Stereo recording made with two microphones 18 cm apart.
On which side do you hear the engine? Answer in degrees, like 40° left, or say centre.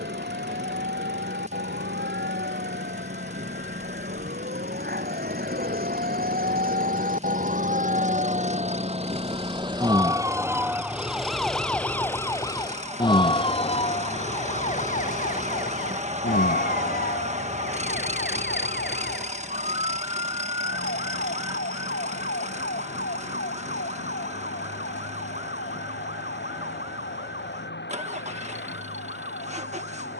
40° right.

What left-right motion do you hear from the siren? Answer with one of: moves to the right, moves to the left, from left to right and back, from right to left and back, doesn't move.
moves to the left.